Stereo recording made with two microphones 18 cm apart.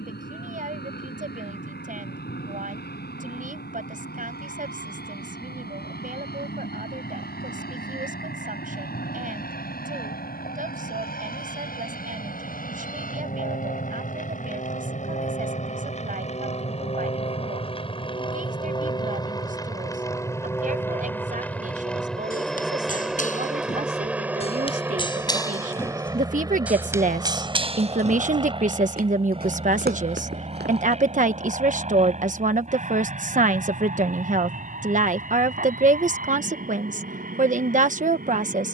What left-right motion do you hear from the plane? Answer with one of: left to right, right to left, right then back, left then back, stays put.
left to right.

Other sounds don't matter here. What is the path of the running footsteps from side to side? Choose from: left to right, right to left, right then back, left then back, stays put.
left to right.